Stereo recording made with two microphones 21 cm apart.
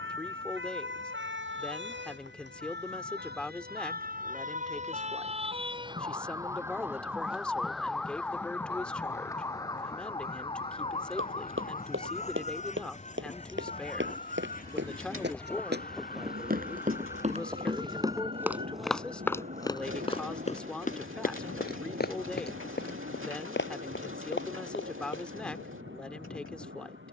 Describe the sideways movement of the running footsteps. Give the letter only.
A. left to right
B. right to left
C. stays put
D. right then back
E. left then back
B.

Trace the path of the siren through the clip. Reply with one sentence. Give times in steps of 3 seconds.
You can hear the siren on the right from 0 s, in the centre from 6 s and on the left from 9 s.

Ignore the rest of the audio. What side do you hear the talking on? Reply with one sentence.
You can hear the talking in the centre.